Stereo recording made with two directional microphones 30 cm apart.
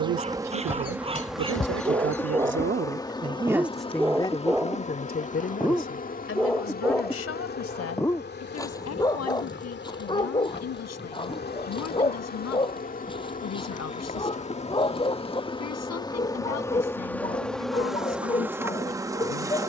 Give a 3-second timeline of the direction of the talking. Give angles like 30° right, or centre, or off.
50° right, 20° left, 50° left, 60° left, 60° left, 60° left, 60° left.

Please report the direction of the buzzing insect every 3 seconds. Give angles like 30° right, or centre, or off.
centre, 20° left, 30° left, 40° left, 30° left, 10° left, 10° right.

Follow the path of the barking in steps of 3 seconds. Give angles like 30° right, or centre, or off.
20° right, centre, 10° left, 20° left, 20° left, 20° left, 20° left.